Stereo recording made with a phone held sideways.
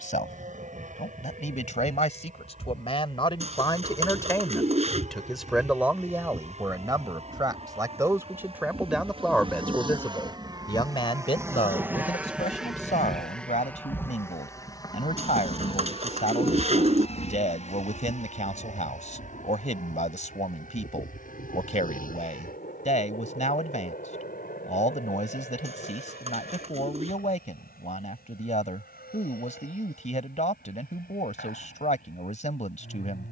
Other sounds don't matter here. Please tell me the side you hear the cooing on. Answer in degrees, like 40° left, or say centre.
50° right.